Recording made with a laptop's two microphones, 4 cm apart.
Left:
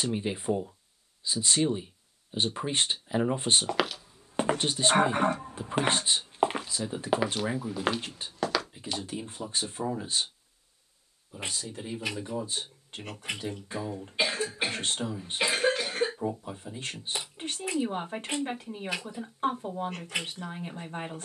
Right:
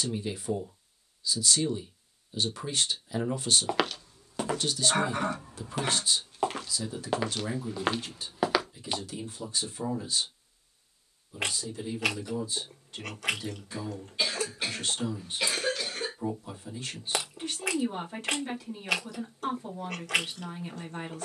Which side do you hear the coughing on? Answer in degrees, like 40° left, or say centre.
20° left.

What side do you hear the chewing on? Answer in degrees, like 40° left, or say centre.
80° right.